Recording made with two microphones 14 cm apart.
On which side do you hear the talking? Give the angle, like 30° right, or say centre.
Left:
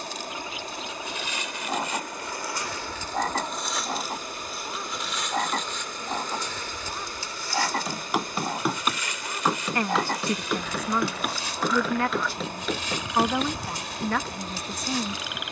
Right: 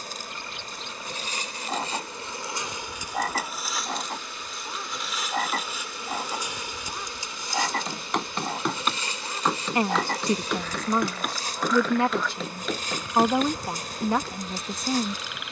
20° right.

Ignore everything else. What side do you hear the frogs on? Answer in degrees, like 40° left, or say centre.
centre.